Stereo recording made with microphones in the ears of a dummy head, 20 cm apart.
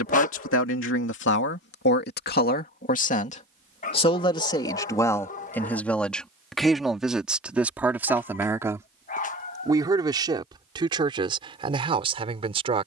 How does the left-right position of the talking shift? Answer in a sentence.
You can hear the talking travel towards the right.